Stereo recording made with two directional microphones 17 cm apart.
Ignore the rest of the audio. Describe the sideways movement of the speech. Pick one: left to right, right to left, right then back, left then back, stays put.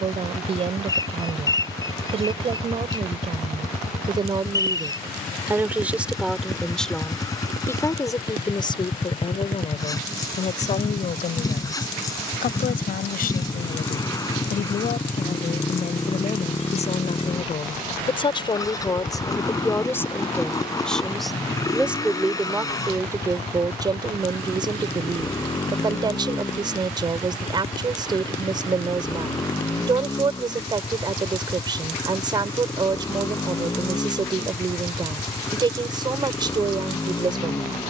left then back.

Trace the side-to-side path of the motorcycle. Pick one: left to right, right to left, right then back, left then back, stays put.
stays put.